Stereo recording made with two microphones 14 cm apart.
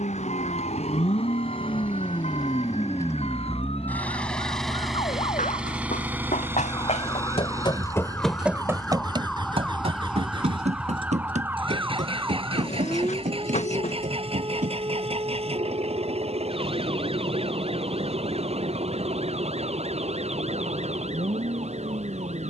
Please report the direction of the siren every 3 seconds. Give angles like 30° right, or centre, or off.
60° left, 50° left, 20° left, 10° right, 30° right, 40° right, 50° right, 60° right.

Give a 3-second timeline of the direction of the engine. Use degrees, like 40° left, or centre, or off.
40° left, centre, 20° right, 40° right, 50° right, 50° right, 50° right, 60° right.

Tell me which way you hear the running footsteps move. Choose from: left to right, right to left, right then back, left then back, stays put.
left to right.